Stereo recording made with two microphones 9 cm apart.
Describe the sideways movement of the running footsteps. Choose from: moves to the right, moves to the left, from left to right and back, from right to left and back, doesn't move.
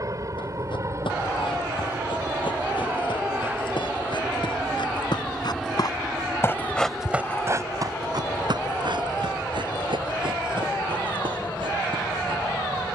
moves to the right.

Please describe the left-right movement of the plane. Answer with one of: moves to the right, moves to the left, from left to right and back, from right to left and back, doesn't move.
moves to the left.